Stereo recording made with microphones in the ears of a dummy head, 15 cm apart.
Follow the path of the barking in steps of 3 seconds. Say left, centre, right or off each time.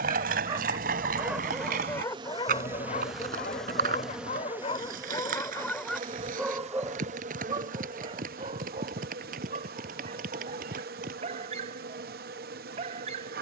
centre, left, right, right, right.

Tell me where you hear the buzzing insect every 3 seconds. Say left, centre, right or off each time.
right, centre, right, right, right.